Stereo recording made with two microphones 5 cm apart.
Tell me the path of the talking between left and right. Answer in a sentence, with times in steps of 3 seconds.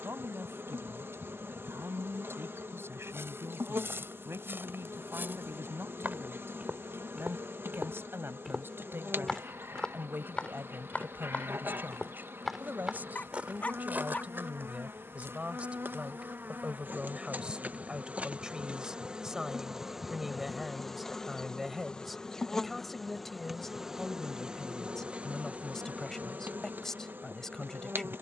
You can hear the talking on the right from 0 s and in the centre from 18 s.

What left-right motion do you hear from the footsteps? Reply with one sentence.
In this clip you hear the footsteps move from right to left and back again.